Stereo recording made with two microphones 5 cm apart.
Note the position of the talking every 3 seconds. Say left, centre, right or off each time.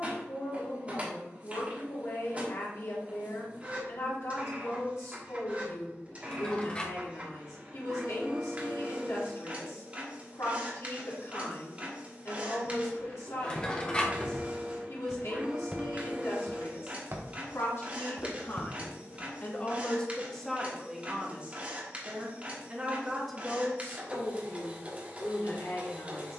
left, left, left, left, left, left, left, centre, left.